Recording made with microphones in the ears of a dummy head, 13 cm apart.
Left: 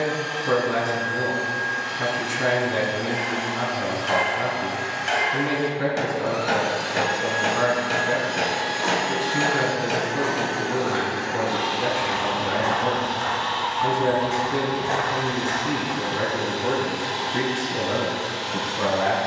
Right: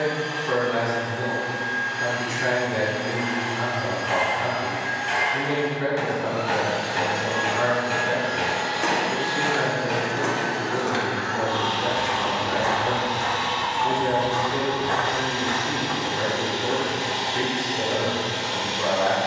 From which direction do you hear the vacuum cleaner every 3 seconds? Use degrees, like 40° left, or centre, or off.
70° left, 70° left, 60° left, 30° left, 20° right, 30° right, 30° right.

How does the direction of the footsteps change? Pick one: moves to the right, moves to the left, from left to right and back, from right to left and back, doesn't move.
moves to the left.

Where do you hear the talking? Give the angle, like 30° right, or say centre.
80° left.